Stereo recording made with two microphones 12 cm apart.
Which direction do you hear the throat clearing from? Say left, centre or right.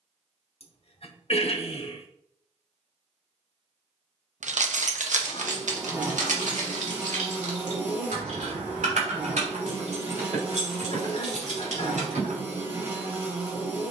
left.